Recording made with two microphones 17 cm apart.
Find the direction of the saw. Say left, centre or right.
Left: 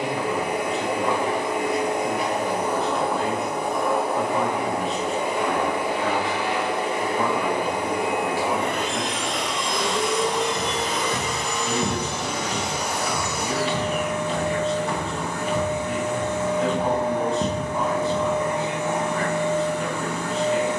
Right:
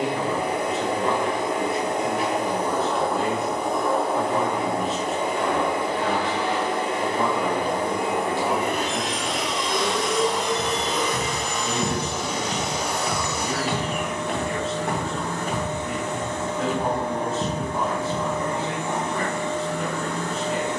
right.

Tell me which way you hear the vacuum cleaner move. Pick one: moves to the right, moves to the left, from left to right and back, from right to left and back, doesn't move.
doesn't move.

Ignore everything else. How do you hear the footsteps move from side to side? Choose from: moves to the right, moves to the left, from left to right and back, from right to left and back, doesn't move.
from left to right and back.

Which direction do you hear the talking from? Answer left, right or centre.
centre.